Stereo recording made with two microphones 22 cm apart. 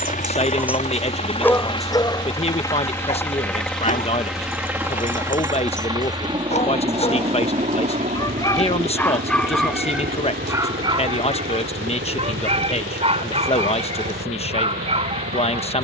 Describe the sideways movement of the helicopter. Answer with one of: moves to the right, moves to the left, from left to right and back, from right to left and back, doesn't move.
moves to the right.